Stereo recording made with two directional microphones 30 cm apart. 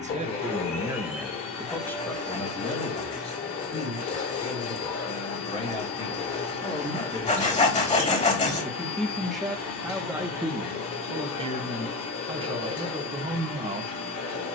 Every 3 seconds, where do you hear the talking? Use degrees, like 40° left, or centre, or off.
centre, 20° left, 10° left, 10° right, 20° right.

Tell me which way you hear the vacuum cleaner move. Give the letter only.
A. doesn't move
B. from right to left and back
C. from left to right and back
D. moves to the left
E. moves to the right
A.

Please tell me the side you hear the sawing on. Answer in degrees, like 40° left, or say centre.
20° left.